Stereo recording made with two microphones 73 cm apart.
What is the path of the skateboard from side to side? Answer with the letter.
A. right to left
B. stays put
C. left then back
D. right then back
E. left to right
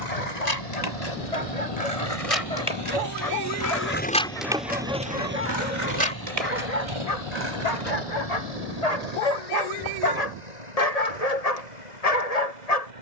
E.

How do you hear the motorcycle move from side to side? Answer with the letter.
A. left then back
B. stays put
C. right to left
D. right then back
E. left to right
E.